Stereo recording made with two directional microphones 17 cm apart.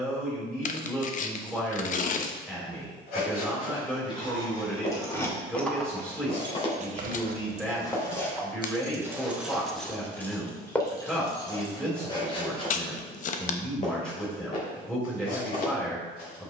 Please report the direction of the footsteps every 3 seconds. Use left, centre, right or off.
off, left, left, centre, left, left.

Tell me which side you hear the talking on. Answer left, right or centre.
centre.